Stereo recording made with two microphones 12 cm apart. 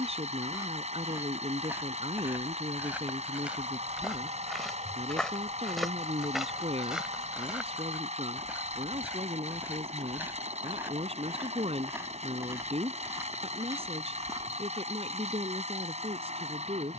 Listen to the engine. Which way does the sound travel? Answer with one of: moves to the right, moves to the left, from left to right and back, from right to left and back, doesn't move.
doesn't move.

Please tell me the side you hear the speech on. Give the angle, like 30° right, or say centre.
60° right.